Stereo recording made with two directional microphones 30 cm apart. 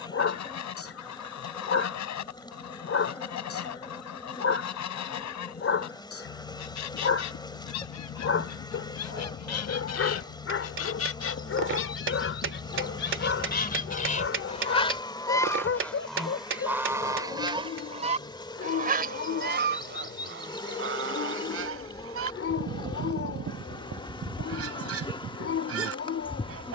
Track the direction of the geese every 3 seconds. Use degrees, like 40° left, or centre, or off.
70° left, 70° left, 70° left, 50° left, 30° left, centre, 30° right, 50° right, 50° right.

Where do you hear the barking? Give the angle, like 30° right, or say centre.
50° left.